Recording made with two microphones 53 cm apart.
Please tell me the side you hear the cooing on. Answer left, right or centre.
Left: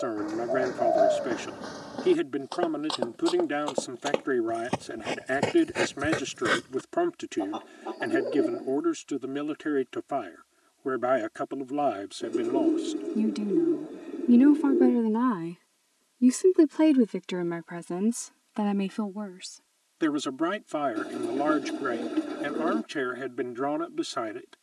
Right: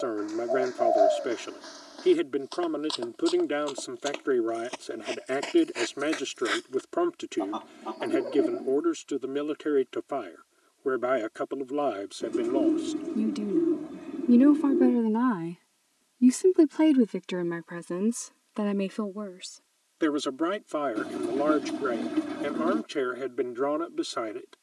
right.